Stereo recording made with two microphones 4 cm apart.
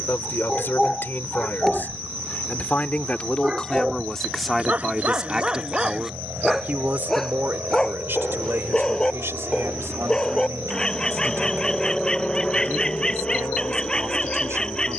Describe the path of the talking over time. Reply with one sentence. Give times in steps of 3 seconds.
In this clip you hear the talking on the left from 0 s, in the centre from 3 s and on the right from 6 s.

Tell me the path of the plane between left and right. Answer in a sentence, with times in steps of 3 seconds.
You can hear the plane on the right from 0 s and on the left from 12 s.